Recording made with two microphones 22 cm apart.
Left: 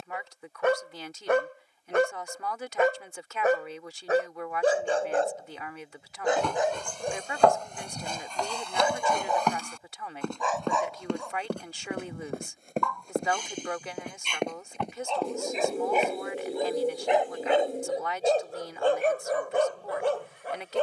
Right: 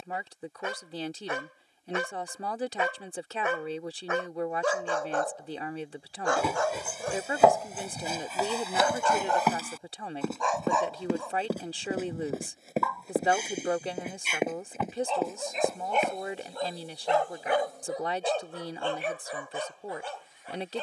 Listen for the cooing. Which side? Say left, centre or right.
left.